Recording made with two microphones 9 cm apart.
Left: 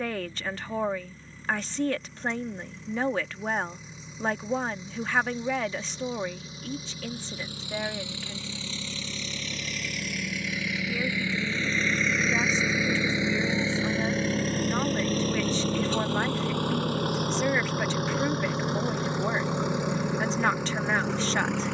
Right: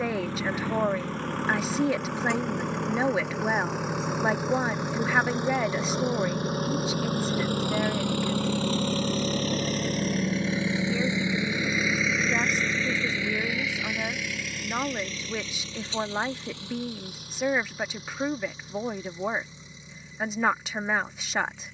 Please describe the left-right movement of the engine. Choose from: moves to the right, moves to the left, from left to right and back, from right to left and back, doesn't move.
moves to the left.